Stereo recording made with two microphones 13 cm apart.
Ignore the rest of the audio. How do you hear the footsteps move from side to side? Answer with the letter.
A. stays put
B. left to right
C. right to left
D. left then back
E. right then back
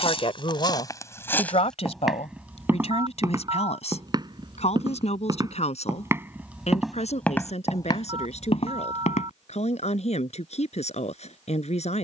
E.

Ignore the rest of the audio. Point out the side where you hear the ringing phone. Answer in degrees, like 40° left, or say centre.
40° right.